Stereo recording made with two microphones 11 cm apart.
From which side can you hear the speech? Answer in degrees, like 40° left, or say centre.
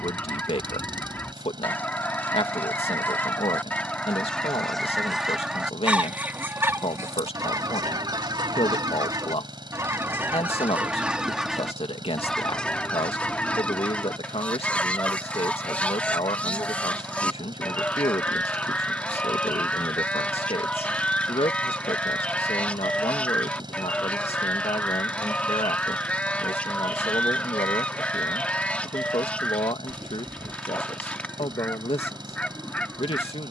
60° left.